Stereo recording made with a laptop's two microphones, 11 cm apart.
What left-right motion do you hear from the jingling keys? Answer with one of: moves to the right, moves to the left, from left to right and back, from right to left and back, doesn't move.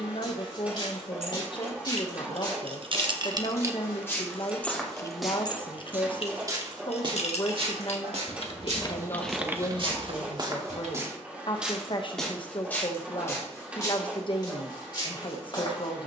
from right to left and back.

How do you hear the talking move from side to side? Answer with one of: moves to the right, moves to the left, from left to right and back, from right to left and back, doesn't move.
doesn't move.